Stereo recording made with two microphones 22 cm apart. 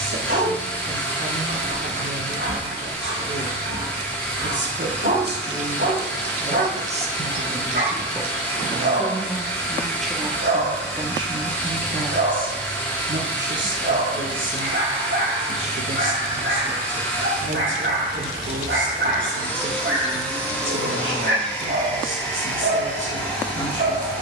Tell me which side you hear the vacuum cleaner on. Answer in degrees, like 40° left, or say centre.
10° left.